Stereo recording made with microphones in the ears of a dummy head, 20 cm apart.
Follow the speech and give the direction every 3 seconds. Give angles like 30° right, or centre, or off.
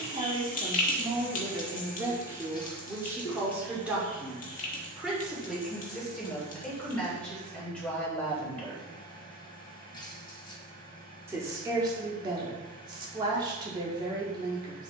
20° right, centre, centre, 20° right, 20° right.